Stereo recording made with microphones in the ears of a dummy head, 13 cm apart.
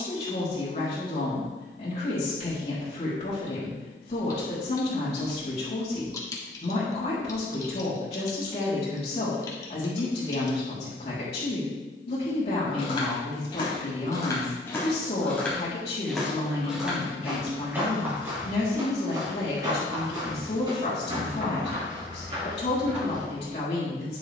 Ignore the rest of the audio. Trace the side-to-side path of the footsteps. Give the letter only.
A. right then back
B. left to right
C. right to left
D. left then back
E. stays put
B.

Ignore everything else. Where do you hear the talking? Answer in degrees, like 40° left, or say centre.
40° left.